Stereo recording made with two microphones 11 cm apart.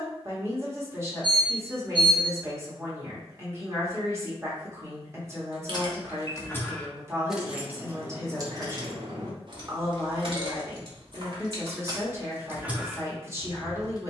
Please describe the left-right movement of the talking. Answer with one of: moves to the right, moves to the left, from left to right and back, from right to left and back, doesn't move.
doesn't move.